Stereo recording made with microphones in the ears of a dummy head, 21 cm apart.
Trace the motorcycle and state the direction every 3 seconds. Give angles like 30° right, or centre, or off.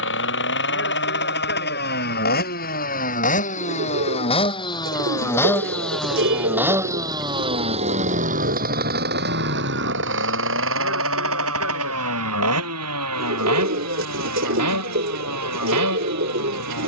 50° left, 20° left, 20° right, 60° right, 70° right, 80° right.